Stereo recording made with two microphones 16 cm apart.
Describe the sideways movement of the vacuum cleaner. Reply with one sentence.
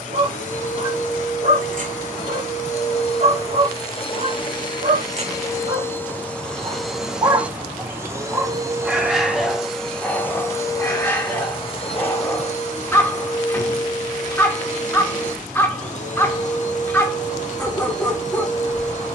You can hear the vacuum cleaner go right and come back.